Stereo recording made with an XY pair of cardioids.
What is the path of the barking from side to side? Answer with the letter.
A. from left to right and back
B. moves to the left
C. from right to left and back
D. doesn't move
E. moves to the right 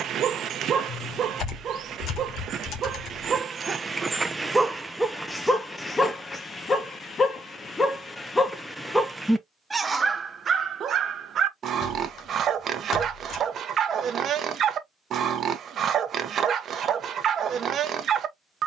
C.